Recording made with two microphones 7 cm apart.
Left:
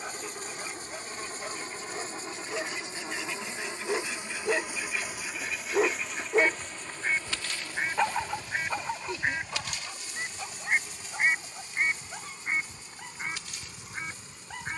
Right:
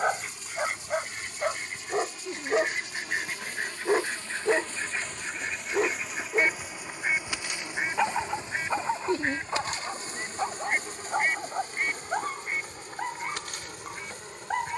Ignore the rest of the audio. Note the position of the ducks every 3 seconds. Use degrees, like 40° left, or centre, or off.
60° right, 40° right, 10° right, 10° left, 30° left.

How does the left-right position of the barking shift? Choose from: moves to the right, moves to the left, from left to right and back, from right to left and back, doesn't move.
from right to left and back.